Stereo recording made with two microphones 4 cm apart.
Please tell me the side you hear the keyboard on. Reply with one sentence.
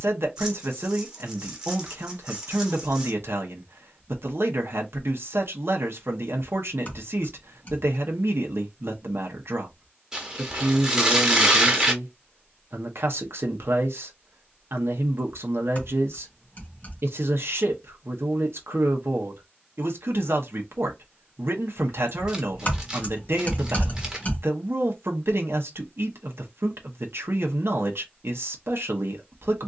In this clip you hear the keyboard on the left.